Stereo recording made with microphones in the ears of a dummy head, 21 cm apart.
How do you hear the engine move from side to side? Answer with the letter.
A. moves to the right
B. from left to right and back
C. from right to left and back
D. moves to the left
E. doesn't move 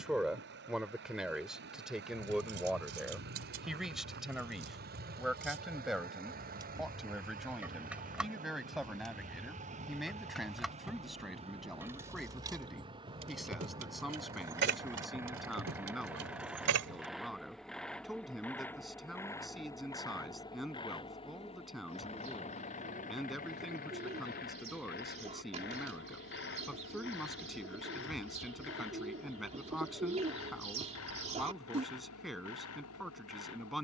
D.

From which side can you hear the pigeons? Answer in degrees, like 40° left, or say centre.
30° right.